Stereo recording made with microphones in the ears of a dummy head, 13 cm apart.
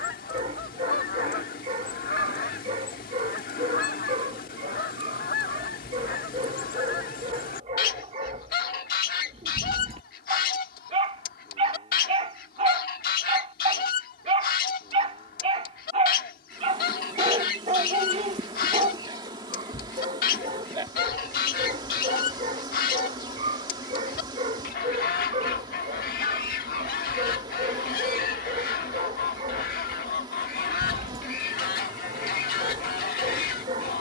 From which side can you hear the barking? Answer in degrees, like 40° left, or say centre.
40° right.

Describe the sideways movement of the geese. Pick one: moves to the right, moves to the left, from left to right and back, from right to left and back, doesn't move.
doesn't move.